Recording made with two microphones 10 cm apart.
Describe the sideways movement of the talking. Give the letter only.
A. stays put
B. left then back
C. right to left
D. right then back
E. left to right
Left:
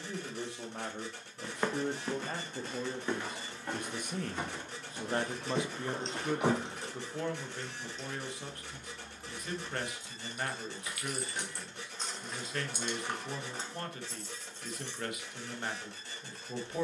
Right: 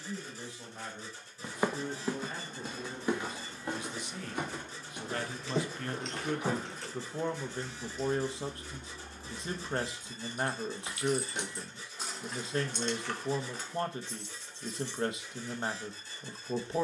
E.